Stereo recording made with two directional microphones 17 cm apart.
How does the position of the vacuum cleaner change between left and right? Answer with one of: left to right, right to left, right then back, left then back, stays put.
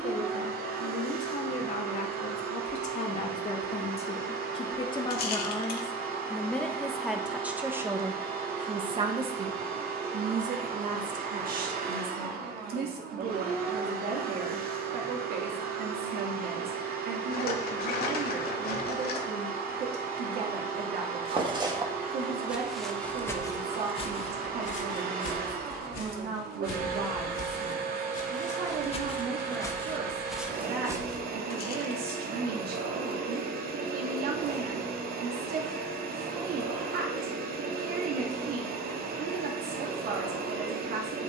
stays put.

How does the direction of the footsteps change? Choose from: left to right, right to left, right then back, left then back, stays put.
left then back.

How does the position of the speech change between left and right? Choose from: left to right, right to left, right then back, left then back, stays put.
left to right.